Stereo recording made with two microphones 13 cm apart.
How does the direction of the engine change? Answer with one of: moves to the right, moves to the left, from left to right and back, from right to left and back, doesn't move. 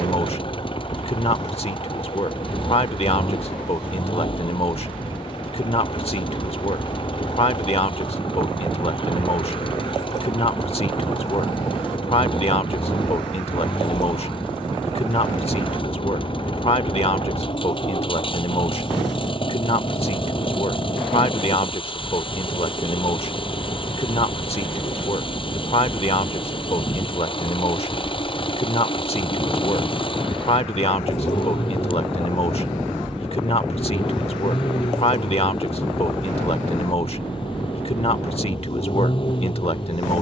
doesn't move.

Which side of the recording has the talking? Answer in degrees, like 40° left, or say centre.
40° left.